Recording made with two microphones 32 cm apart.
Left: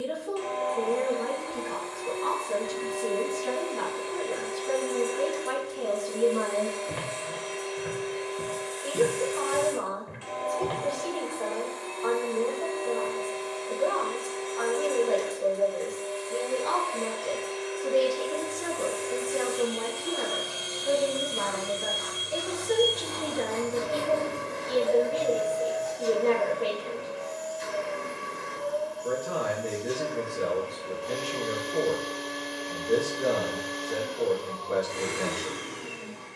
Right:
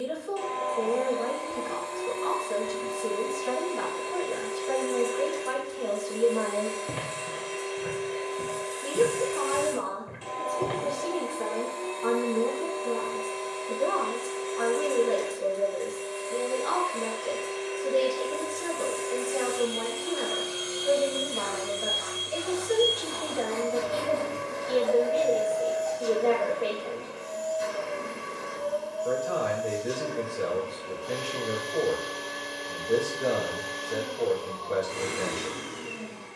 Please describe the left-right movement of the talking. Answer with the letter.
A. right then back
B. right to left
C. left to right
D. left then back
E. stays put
A.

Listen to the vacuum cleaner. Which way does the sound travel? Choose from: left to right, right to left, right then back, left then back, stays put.
left then back.